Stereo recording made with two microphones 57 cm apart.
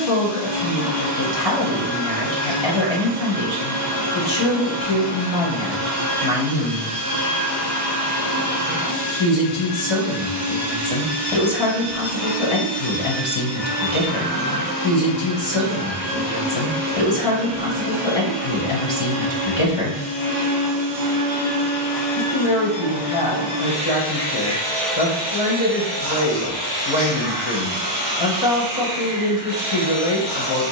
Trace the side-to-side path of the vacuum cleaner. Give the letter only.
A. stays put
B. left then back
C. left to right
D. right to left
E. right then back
B.